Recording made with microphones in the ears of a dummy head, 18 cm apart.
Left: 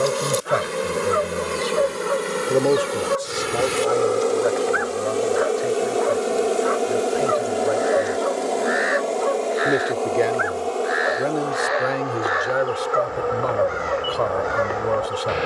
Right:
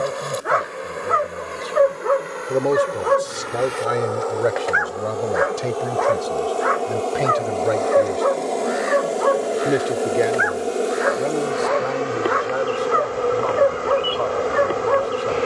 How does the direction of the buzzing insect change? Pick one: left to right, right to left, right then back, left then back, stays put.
left to right.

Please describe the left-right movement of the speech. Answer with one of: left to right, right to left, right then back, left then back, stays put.
right then back.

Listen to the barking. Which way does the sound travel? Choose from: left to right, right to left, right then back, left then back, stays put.
stays put.